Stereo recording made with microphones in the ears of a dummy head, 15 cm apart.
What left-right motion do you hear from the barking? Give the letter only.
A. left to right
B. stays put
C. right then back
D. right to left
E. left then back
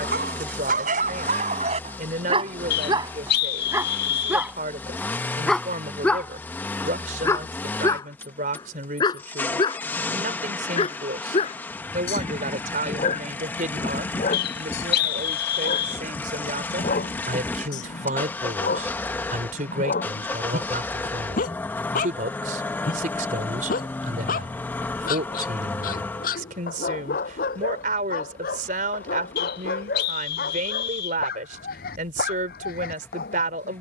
D.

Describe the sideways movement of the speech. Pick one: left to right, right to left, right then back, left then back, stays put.
stays put.